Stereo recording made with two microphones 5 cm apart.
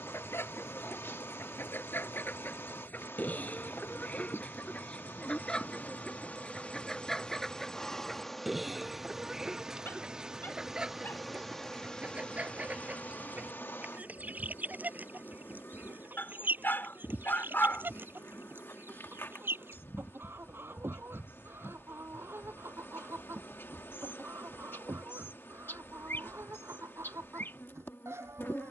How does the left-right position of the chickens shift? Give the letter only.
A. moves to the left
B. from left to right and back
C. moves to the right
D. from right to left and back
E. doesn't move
C.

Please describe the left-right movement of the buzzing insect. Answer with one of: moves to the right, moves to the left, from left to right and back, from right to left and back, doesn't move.
from left to right and back.